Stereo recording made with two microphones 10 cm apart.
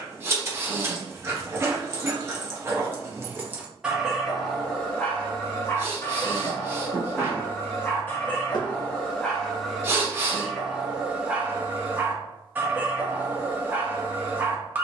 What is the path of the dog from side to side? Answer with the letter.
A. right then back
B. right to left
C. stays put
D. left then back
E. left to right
D.